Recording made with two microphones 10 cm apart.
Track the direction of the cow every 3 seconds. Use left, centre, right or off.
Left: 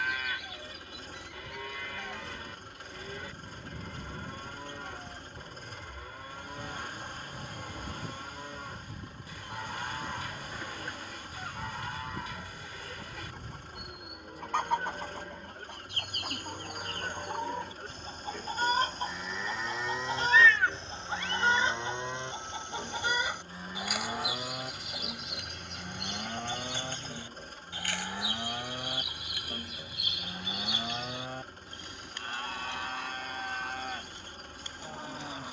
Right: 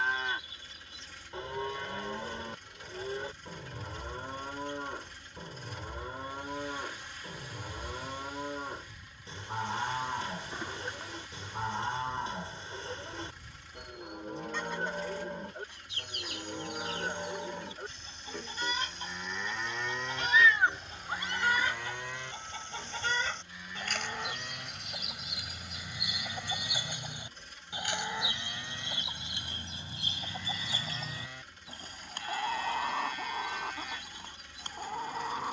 right, right, right, right, right, right, centre, left, left, left, left, left.